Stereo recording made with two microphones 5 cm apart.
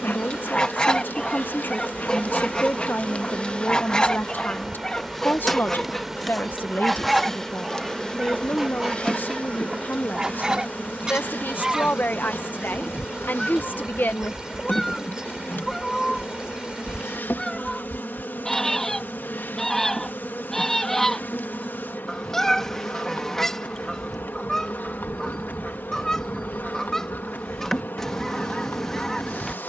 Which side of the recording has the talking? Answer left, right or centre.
left.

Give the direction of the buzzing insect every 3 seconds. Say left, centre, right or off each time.
left, centre, centre, left, left, left, left, left, left, left.